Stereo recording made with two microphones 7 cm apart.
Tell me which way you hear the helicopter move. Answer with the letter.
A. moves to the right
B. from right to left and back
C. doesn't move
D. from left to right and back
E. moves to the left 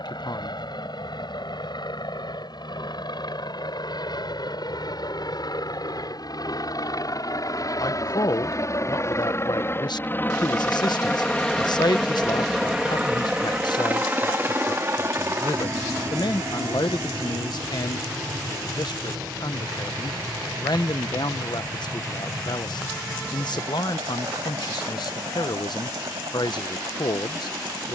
A.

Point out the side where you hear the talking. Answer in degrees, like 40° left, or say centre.
70° left.